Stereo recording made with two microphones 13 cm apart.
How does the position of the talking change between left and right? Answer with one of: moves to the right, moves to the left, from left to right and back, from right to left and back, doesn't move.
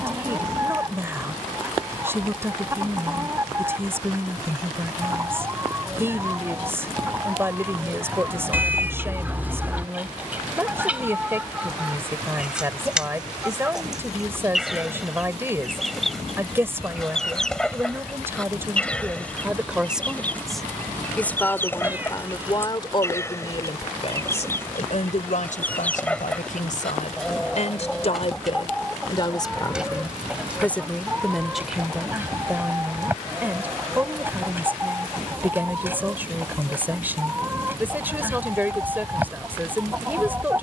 from right to left and back.